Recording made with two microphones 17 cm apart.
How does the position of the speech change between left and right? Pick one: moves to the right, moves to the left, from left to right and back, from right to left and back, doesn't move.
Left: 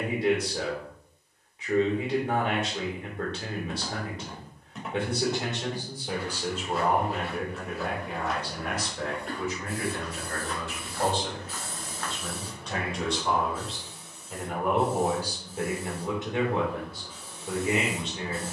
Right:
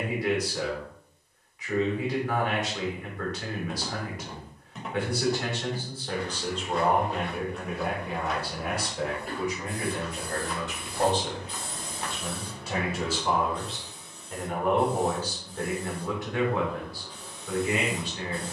from left to right and back.